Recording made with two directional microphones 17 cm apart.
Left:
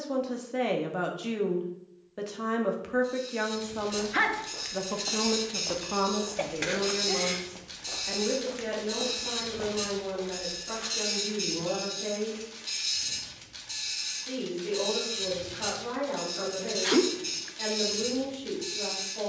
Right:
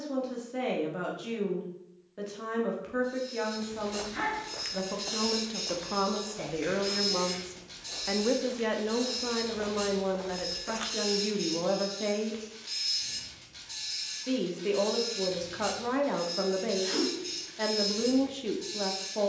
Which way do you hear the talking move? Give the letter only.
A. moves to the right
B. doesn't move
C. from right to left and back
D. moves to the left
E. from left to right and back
A.